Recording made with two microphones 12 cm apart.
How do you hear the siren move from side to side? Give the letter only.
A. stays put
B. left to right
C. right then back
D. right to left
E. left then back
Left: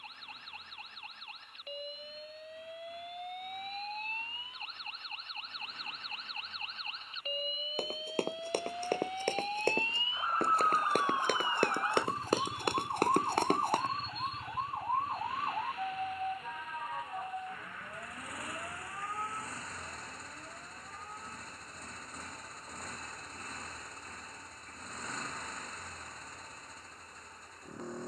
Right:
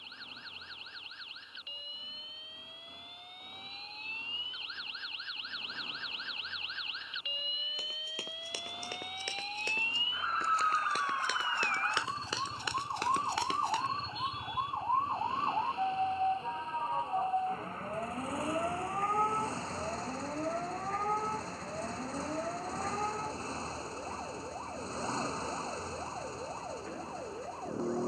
B.